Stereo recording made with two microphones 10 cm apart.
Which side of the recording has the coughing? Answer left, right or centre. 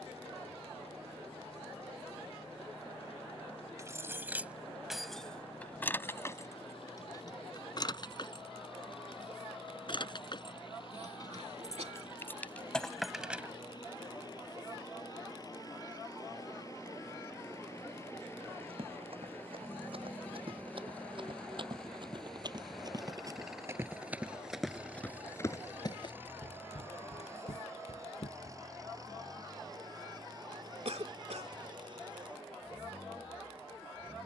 right.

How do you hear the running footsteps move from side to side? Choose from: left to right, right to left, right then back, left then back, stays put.
right to left.